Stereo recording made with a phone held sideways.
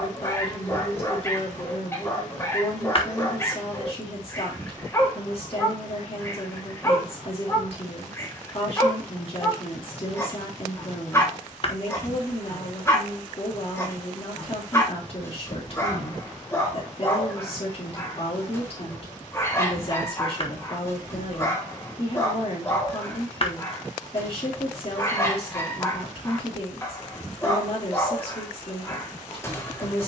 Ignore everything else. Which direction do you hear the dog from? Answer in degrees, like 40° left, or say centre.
20° left.